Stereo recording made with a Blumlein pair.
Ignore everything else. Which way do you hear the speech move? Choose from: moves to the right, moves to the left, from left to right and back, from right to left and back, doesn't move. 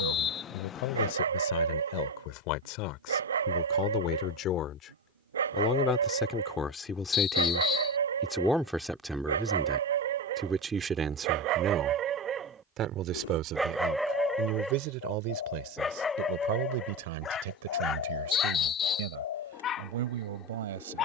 moves to the right.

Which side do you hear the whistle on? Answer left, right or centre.
left.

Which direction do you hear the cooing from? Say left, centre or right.
left.